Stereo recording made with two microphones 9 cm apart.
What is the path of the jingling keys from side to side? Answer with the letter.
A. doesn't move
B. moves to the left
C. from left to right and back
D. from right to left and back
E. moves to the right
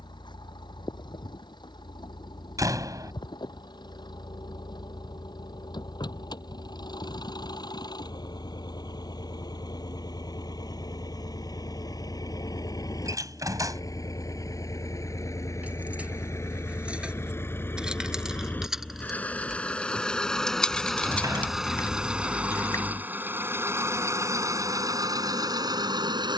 B.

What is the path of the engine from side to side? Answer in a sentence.
You can hear the engine travel towards the right.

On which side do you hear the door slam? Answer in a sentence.
In this clip you hear the door slam on the right.